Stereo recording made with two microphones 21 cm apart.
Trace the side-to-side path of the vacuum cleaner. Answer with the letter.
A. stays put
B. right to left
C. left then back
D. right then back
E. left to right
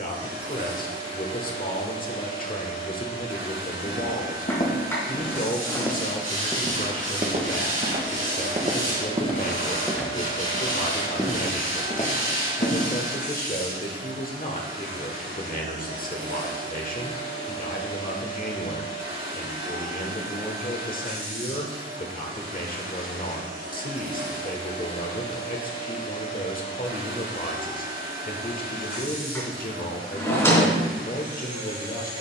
A.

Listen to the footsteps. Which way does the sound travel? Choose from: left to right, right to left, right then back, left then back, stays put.
right then back.